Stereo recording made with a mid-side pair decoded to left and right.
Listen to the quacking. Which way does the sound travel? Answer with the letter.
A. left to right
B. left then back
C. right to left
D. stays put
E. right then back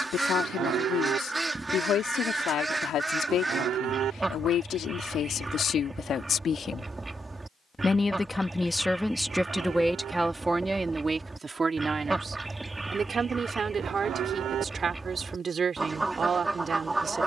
D.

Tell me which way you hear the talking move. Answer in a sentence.
In this clip you hear the talking travel towards the right.